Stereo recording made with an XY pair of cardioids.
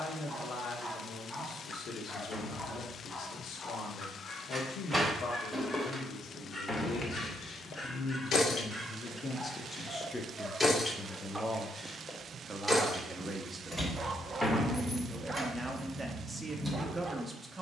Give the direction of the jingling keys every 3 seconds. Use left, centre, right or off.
off, centre, left, left, centre, centre.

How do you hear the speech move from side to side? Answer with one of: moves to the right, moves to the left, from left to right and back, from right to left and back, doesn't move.
moves to the right.